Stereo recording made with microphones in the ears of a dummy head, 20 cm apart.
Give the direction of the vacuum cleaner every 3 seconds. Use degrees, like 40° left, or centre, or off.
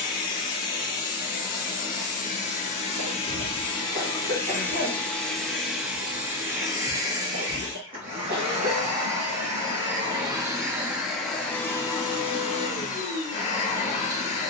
40° left, 10° left, 20° right, 10° right, 30° left.